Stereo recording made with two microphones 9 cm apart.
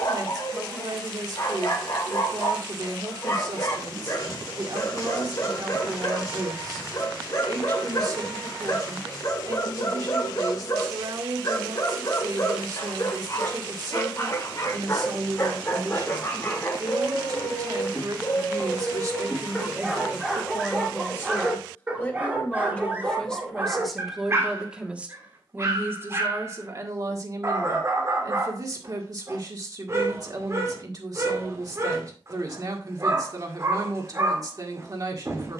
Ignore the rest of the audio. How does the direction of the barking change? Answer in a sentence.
In this clip you hear the barking travel towards the right.